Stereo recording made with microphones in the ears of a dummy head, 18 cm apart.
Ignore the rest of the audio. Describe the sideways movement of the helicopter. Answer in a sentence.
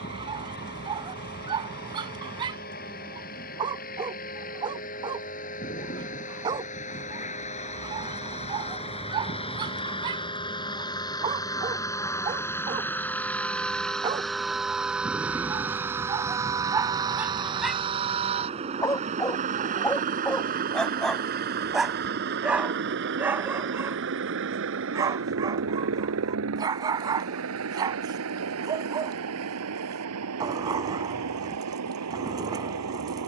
In this clip you hear the helicopter move from left to right.